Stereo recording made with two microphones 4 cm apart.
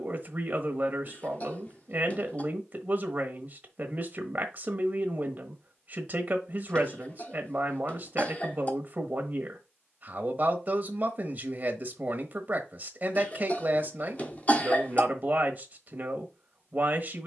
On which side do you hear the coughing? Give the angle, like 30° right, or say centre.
30° left.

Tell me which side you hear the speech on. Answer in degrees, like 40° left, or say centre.
40° right.